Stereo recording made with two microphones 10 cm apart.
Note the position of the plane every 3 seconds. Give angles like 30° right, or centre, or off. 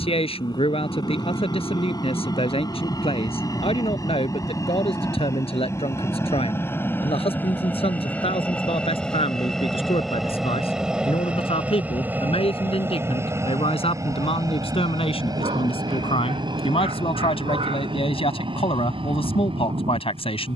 50° left, 40° left, 20° left, centre, 30° right, 40° right, 60° right.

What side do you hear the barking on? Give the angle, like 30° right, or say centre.
80° right.